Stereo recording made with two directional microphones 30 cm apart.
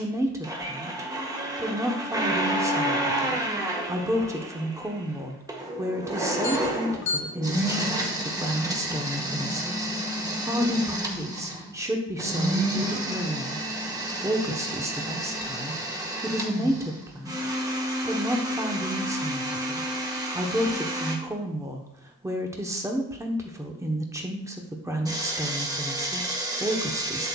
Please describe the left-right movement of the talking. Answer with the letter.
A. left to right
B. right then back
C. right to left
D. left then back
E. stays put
E.